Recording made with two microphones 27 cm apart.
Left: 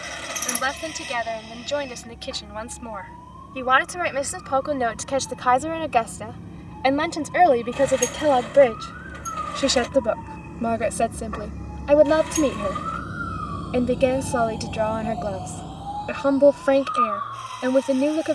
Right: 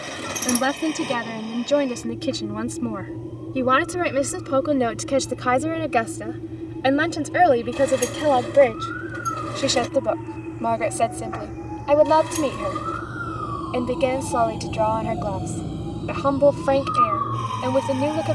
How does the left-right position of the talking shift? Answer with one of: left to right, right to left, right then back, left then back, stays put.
right to left.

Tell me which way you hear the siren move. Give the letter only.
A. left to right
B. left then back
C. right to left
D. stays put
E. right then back
A.